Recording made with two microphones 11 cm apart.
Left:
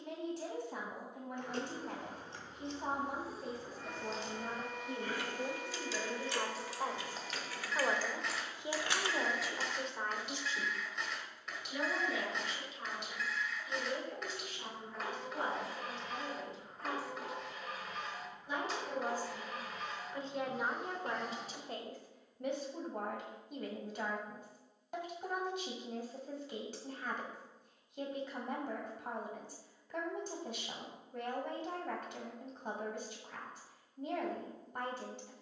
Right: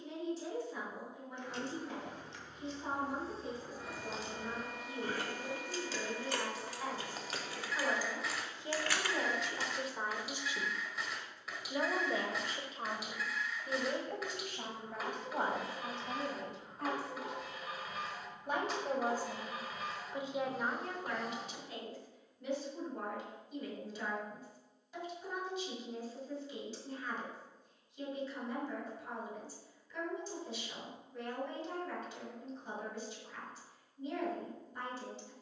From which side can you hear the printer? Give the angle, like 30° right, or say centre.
centre.